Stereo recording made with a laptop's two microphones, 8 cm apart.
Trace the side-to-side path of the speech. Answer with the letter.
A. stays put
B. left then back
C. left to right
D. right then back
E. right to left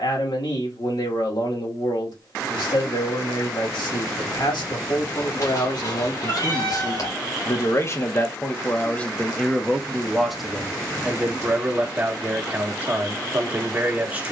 C.